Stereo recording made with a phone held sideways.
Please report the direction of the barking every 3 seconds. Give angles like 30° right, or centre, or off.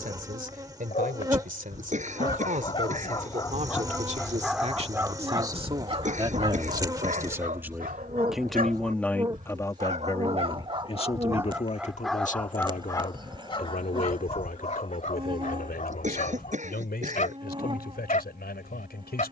40° left, centre, 50° right, 30° right, 30° left, 50° left, 50° left.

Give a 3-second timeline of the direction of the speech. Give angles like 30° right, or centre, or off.
60° right, 40° right, 10° right, 30° left, 60° left, 70° left, 80° left.